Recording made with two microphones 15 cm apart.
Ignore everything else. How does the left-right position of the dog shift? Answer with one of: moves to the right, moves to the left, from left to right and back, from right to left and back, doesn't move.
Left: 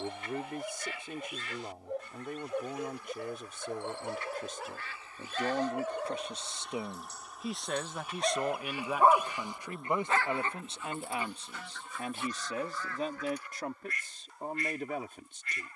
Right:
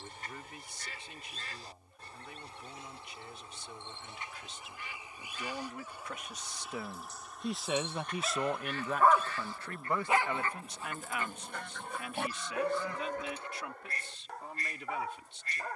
moves to the right.